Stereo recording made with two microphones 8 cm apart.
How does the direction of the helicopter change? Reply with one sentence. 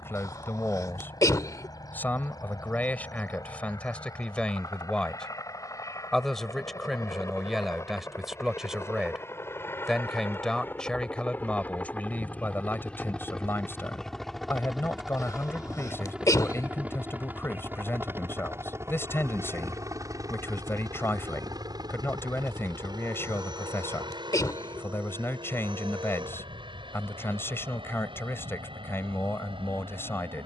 In this clip you hear the helicopter go from the left side to the right.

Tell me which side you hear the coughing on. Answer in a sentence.
In this clip you hear the coughing on the left.